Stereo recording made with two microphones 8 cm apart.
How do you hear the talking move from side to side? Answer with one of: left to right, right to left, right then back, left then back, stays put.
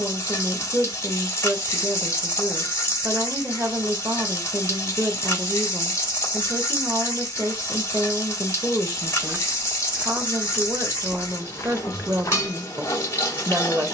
stays put.